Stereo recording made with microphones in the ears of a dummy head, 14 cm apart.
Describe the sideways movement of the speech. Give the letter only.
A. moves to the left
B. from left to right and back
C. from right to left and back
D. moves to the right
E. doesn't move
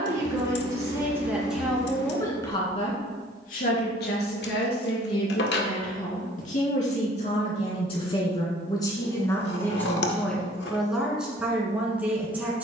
C.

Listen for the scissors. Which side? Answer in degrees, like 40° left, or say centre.
80° left.